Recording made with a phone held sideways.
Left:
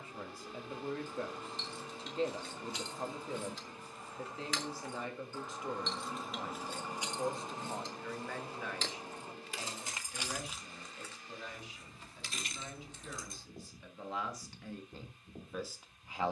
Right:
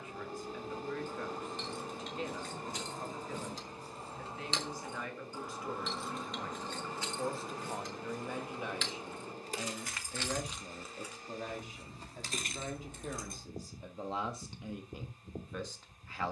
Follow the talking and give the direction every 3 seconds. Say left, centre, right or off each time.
left, left, centre, right, right, centre.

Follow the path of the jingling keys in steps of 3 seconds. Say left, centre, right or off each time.
right, right, left, centre, right, off.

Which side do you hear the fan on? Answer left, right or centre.
right.